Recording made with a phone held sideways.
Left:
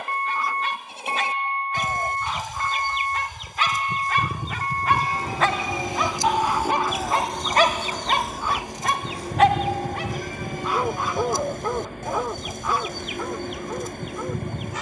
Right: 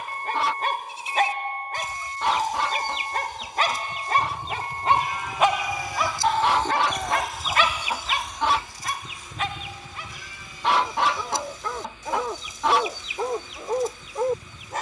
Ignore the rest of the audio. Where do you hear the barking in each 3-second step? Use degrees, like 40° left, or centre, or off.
50° right, 30° right, 30° left, 50° left, 20° right.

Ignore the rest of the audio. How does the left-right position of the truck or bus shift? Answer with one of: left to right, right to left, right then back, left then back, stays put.
stays put.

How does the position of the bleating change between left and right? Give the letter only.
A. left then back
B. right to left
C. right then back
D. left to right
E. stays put
C.